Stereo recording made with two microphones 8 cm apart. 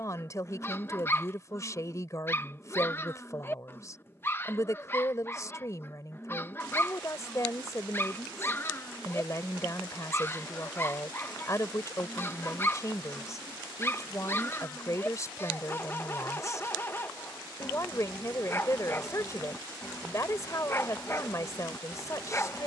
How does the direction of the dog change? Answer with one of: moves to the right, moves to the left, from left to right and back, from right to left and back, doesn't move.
doesn't move.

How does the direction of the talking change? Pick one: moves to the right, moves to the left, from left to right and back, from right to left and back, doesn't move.
doesn't move.